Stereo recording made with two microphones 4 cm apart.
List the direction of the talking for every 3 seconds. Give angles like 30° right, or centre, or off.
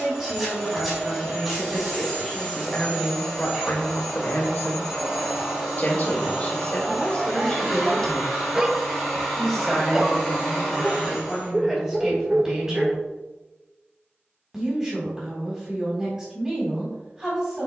10° right, 50° left, 30° left, 10° right, 20° right, 20° right.